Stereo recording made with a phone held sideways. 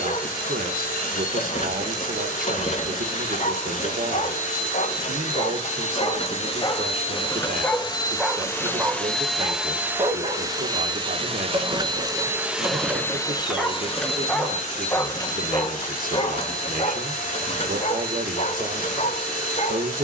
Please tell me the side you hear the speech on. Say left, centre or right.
right.